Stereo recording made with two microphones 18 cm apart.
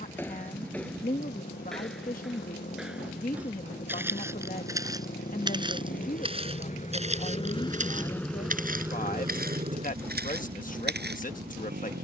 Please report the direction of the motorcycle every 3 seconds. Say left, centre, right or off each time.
left, left, left, right.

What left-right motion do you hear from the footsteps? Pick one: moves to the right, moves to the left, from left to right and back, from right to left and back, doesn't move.
moves to the right.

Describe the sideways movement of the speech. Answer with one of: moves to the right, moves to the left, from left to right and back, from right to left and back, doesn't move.
doesn't move.